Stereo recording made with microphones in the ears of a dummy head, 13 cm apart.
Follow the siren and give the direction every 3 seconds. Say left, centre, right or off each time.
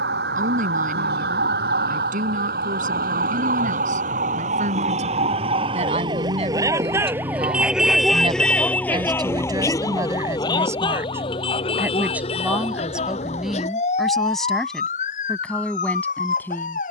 right, right, centre, left, left, left.